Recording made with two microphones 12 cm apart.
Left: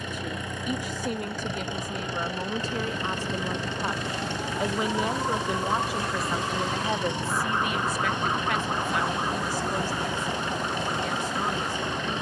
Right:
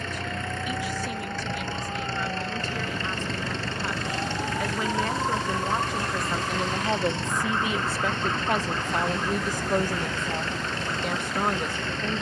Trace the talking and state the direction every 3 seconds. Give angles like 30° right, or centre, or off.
40° left, 20° left, 20° right, 60° right.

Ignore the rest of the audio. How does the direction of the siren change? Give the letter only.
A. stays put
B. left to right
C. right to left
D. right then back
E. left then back
C.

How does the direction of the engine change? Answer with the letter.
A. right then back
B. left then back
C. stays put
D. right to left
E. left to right
C.